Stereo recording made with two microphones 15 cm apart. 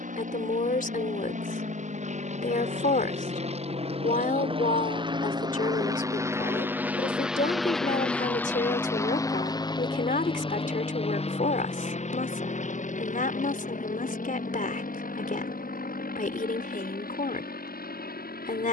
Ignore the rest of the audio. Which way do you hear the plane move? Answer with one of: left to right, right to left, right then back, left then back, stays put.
right to left.